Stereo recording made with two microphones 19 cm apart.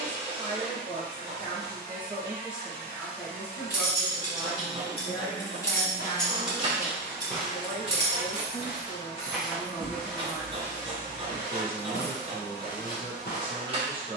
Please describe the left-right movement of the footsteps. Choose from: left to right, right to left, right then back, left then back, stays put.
right then back.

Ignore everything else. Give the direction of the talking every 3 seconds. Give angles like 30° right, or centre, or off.
30° right, 20° left, 20° left, 10° right, 30° right.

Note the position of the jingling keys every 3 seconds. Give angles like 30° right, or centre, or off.
off, 30° left, 20° right, centre, off.